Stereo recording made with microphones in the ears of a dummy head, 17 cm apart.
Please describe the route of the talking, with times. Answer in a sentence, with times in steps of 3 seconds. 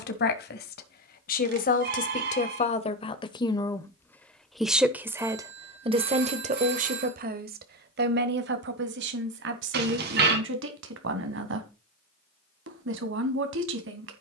In this clip you hear the talking on the left from 0 s, in the centre from 3 s and on the right from 6 s.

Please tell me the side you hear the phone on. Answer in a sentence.
You can hear the phone on the right.